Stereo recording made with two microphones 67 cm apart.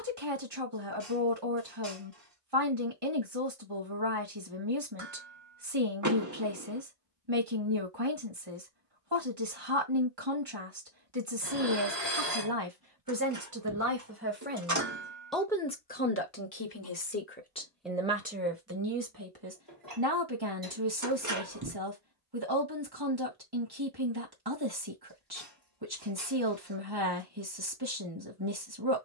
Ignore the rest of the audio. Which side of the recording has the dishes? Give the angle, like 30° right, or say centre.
30° right.